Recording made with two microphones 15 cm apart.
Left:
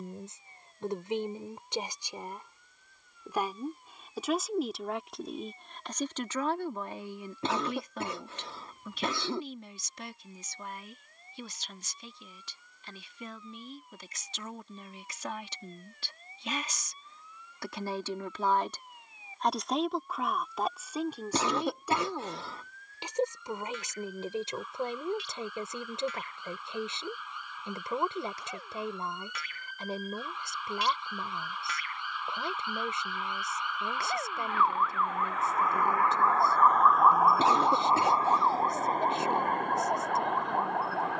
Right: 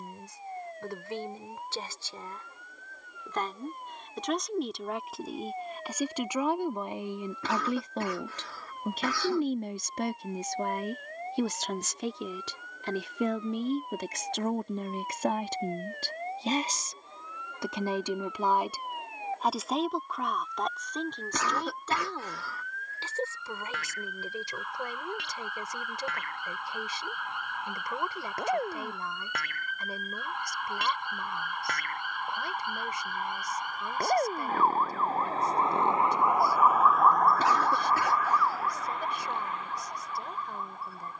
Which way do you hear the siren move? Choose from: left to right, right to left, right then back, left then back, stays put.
right to left.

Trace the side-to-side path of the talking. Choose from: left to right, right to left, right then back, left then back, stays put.
right then back.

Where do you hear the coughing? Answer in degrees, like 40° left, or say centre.
20° left.